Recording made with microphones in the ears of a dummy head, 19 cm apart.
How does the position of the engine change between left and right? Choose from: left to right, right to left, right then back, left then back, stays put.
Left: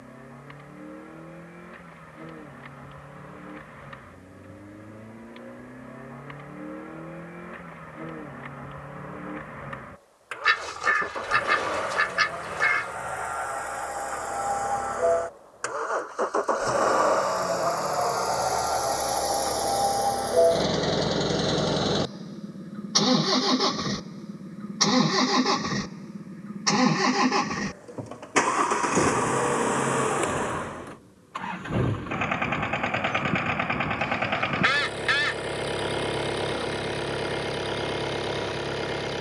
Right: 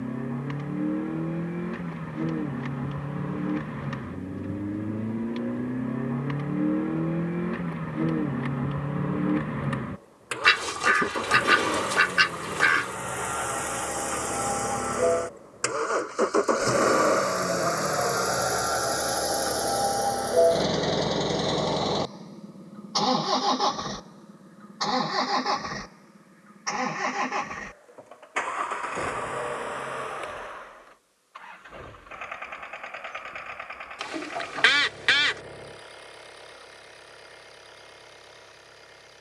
right to left.